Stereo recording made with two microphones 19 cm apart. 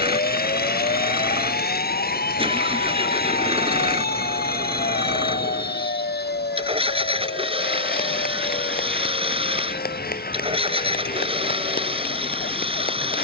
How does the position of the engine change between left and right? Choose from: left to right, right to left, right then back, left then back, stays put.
stays put.